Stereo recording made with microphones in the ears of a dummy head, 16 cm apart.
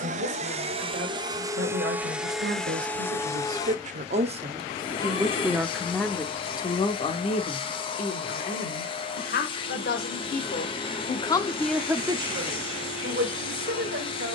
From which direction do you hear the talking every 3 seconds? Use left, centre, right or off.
right, right, left, left, right.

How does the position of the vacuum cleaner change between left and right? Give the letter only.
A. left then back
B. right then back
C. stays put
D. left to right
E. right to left
E.